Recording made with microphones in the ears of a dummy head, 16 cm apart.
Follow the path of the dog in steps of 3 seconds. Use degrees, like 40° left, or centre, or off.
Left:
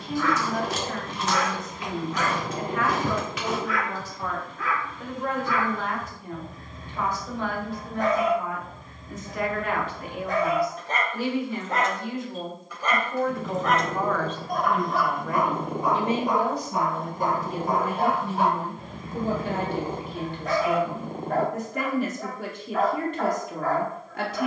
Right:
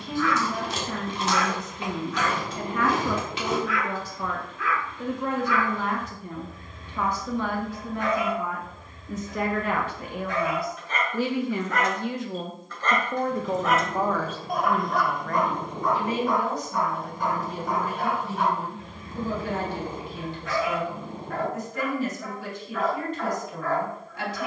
40° left, 40° left, 40° left, 30° left, centre, 20° left, 30° left, 30° left.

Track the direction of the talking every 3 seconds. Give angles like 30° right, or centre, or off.
80° right, 80° right, 80° right, 70° right, 20° right, 20° left, 40° left, 40° left.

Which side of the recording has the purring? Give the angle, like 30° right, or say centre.
40° left.